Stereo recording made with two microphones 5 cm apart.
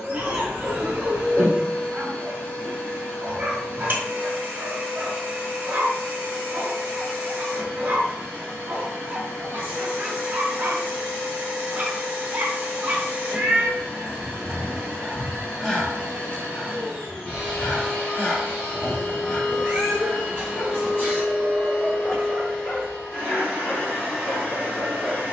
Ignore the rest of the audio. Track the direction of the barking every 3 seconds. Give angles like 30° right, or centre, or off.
40° right, 40° right, 40° right, 40° right, 20° right, 20° left, 40° left, 40° left, 40° left.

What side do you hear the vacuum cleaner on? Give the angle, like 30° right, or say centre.
50° left.